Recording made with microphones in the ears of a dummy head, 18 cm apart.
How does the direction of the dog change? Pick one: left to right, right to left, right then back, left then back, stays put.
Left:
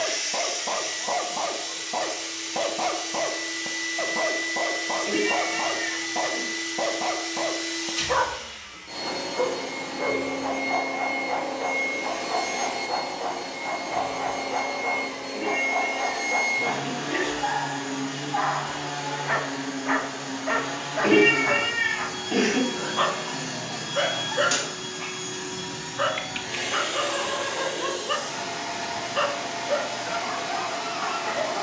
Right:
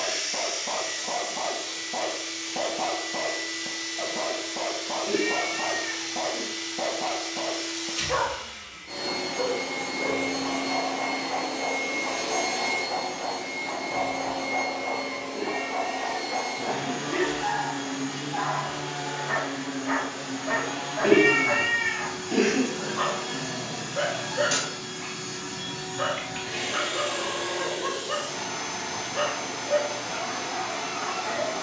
stays put.